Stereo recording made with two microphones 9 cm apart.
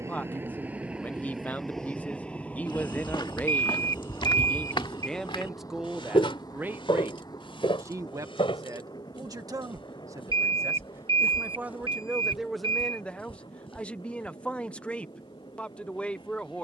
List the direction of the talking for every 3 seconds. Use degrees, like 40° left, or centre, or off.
20° left, 10° left, 30° right, 30° right, 10° left, 10° left.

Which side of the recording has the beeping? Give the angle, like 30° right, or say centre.
80° right.